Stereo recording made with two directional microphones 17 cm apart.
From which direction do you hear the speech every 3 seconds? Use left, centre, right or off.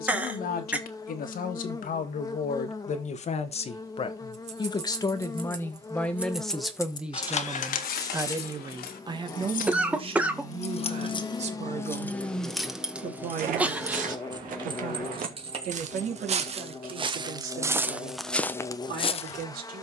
left, left, centre, right, right, right, right.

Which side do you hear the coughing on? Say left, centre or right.
centre.